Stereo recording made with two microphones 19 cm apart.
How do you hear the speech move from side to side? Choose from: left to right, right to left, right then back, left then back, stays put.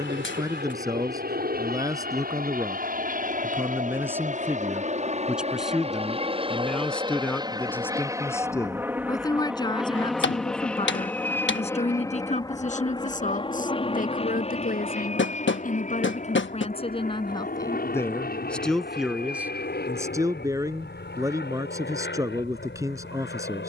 left then back.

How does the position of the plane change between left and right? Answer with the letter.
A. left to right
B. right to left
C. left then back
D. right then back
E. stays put
B.